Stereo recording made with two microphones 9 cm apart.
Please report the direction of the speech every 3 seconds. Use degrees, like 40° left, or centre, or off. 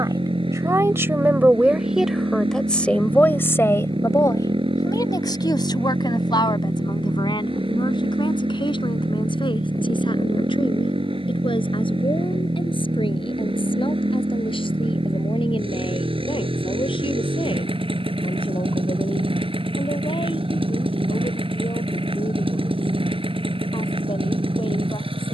20° right, 40° left, 60° left, 70° left, 70° left, 70° left, 80° left, 80° left, 80° left.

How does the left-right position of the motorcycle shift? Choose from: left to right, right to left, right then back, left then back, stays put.
stays put.